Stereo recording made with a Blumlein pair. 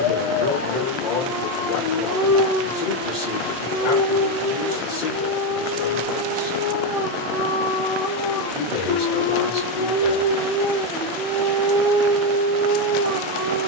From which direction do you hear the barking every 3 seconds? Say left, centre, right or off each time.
left, left, left, centre, right.